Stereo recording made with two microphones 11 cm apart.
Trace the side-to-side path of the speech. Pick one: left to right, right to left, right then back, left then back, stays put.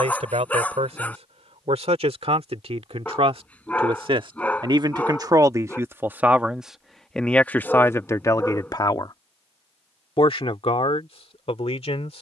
right to left.